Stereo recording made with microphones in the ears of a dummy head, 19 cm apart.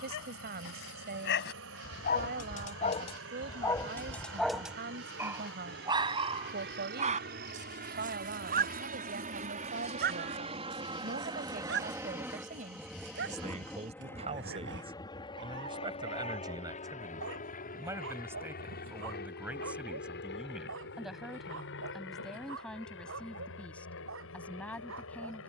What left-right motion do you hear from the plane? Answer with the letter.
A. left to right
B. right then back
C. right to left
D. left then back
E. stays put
C.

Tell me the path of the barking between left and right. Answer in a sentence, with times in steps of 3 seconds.
You can hear the barking on the left from 0 s, in the centre from 3 s and on the right from 6 s.